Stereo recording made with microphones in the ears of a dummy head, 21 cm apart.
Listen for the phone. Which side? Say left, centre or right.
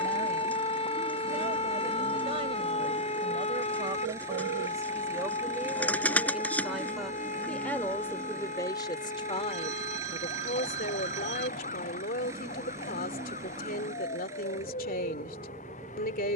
right.